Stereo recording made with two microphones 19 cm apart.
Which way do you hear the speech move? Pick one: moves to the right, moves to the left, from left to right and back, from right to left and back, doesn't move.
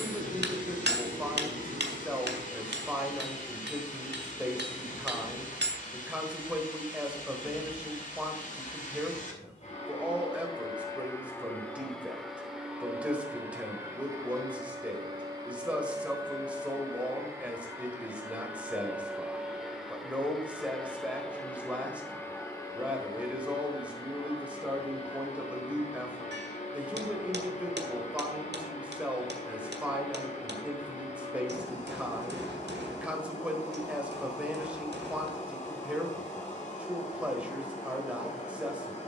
doesn't move.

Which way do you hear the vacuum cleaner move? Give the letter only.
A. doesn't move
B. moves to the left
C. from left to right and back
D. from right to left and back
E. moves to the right
C.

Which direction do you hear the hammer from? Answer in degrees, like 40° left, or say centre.
70° right.